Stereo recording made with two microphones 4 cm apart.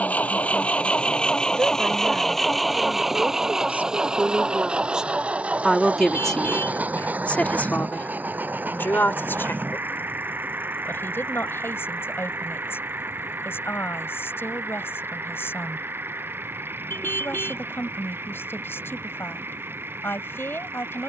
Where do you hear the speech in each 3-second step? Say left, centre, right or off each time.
right, right, left, left, left, left, left.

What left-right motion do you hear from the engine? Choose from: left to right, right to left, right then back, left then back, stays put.
left to right.